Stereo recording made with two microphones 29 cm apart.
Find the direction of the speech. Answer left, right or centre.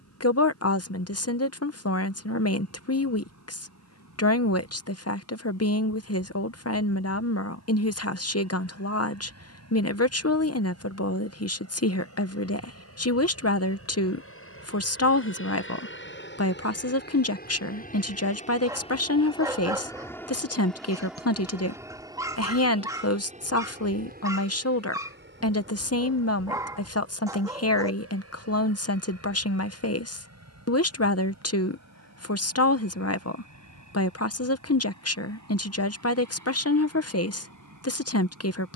left.